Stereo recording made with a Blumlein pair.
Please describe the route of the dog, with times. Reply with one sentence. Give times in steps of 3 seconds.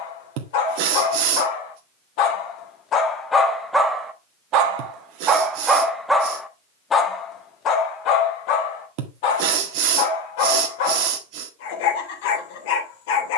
In this clip you hear the dog on the left from 0 s, in the centre from 3 s and on the left from 6 s.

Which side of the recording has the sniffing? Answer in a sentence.
In this clip you hear the sniffing on the right.